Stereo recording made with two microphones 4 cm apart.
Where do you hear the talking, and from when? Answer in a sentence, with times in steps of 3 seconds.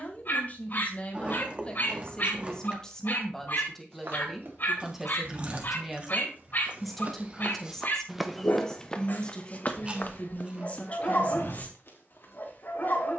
You can hear the talking on the left from 0 s, in the centre from 3 s, on the left from 9 s and not at all from 12 s.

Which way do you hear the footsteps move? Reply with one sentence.
You can hear the footsteps travel towards the left.